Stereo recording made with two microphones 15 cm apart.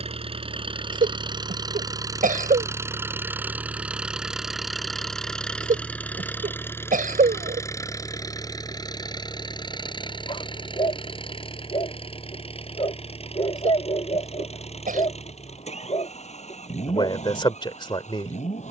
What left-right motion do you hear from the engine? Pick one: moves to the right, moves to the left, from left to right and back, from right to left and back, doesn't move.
moves to the left.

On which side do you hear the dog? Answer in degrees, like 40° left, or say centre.
40° left.